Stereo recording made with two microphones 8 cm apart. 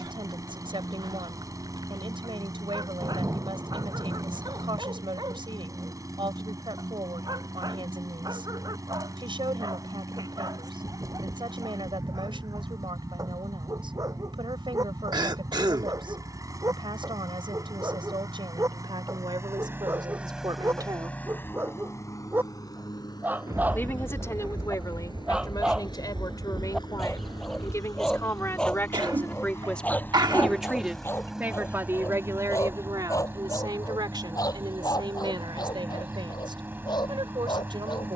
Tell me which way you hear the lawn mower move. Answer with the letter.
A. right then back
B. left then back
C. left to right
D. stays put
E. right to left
B.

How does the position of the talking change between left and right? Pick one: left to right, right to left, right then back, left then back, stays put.
left then back.